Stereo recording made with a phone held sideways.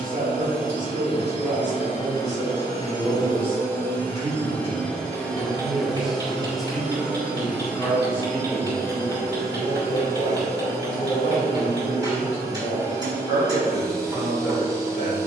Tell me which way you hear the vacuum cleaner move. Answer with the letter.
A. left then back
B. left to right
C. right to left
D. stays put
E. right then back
B.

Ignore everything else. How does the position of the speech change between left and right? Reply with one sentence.
You can hear the speech travel towards the left.